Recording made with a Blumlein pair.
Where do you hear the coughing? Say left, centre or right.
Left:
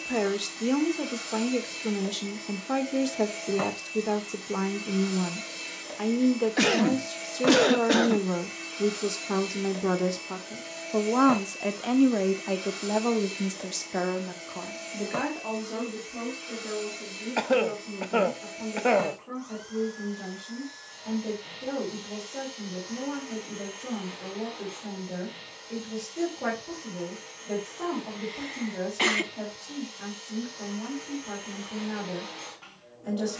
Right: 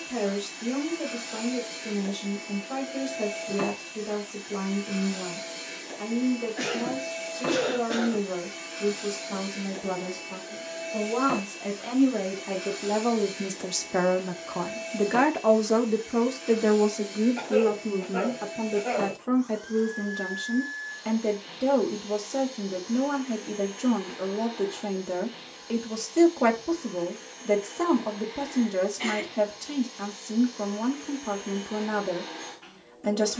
left.